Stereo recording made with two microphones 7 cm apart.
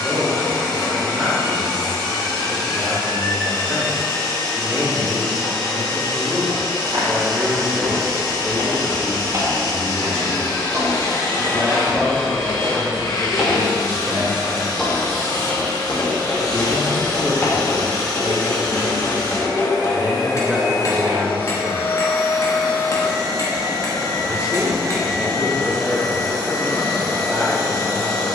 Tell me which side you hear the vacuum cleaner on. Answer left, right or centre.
left.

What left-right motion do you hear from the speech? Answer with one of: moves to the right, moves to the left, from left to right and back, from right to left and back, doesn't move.
doesn't move.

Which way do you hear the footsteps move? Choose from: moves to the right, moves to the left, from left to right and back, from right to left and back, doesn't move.
moves to the left.